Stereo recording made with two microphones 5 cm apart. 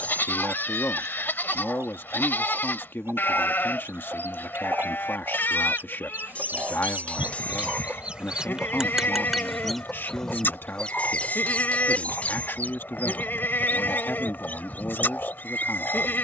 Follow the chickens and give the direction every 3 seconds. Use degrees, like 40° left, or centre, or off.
70° right, 60° right, 30° right, 10° left, 40° left, 40° left.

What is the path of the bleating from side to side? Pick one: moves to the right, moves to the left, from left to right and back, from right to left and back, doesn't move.
doesn't move.